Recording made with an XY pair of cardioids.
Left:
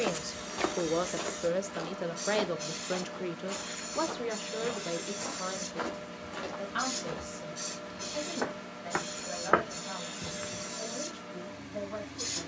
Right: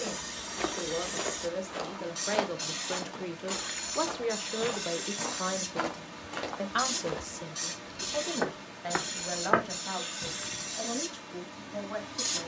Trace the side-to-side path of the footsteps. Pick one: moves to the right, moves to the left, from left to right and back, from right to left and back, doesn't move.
from left to right and back.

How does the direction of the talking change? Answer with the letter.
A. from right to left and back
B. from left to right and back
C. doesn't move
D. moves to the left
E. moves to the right
E.